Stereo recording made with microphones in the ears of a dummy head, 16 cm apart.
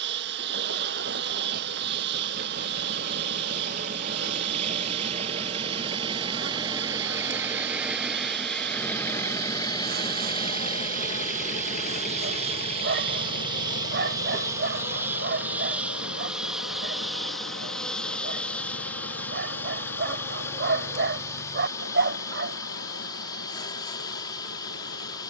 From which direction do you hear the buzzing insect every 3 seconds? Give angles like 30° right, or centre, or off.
60° right, 60° right, 60° right, 50° right, 20° right, centre, 10° left, 20° left, 20° left.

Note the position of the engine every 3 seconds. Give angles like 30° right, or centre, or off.
50° right, 40° right, 10° right, 30° left, 60° left, 70° left, 80° left, 80° left, 80° left.